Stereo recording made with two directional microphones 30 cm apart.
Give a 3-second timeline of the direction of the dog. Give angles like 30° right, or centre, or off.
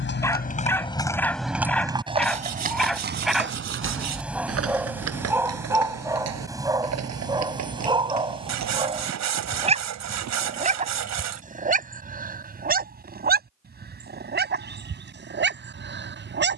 centre, centre, 10° right, 20° right, 30° right, 40° right.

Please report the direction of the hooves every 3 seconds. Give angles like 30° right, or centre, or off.
centre, 50° right, 60° right, 60° right, off, off.